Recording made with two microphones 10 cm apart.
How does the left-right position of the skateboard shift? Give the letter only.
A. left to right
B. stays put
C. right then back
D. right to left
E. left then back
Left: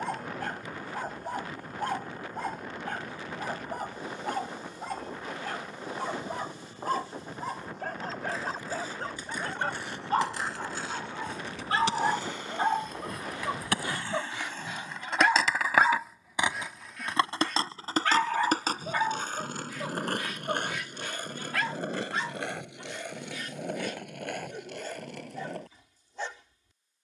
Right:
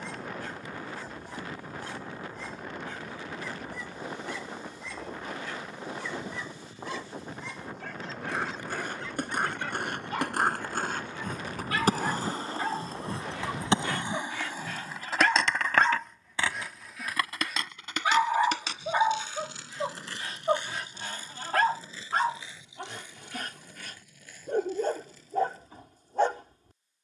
D.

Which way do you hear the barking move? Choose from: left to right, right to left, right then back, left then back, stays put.
left to right.